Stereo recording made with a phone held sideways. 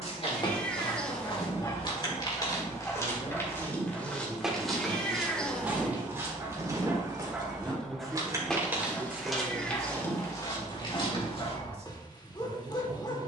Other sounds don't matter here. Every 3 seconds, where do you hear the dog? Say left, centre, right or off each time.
left, centre, centre, left, left.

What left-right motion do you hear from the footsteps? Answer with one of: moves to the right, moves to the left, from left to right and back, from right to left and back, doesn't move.
from left to right and back.